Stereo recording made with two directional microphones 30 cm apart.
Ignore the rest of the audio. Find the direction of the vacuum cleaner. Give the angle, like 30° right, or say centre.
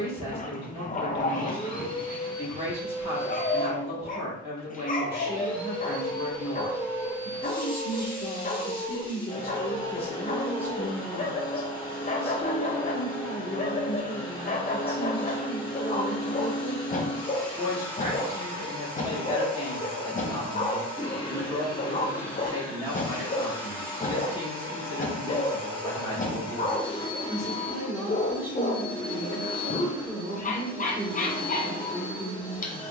10° left.